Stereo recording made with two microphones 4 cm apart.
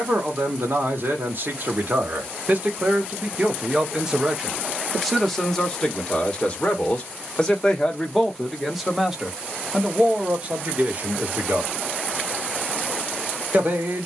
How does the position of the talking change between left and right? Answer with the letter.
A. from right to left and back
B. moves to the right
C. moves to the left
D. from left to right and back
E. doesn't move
A.